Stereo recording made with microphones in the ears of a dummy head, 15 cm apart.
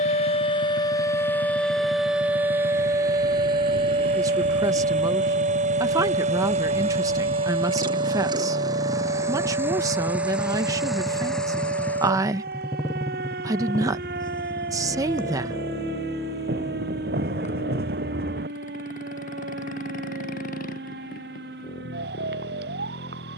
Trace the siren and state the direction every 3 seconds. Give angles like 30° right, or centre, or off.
10° left, 30° right, 50° right, 60° right, 60° right, 60° right, 60° right, 60° right.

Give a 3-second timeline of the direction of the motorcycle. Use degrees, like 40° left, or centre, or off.
60° right, 50° right, 30° right, centre, 20° left, 40° left, 50° left, 60° left.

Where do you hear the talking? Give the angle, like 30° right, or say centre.
20° right.